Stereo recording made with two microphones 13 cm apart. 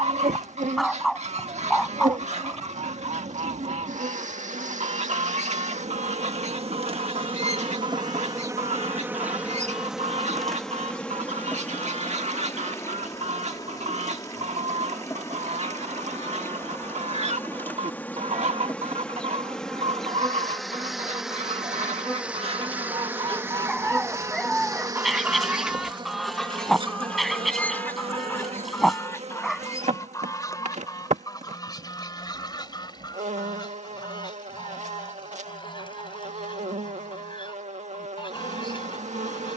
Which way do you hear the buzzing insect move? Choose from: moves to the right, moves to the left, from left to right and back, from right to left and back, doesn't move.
from right to left and back.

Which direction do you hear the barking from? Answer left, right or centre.
centre.